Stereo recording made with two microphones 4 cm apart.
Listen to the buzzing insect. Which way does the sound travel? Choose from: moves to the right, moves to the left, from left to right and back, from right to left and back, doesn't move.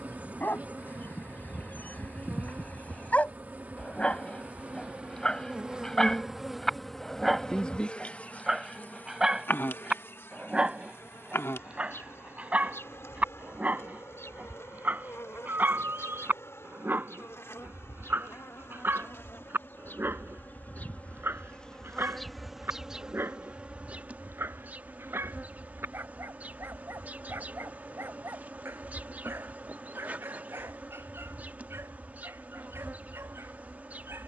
from right to left and back.